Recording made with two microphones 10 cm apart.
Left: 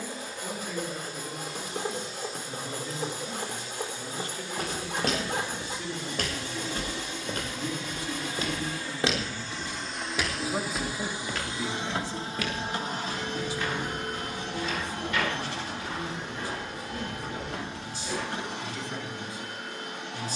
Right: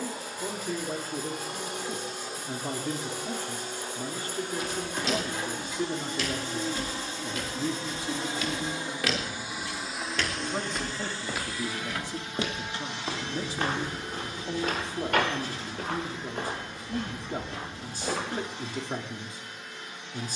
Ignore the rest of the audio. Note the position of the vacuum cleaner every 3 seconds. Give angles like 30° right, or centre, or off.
60° right, 50° right, 30° right, 10° left, 50° left, 60° left, 60° left.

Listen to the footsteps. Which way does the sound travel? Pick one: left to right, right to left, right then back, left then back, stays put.
left to right.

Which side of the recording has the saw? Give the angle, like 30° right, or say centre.
60° left.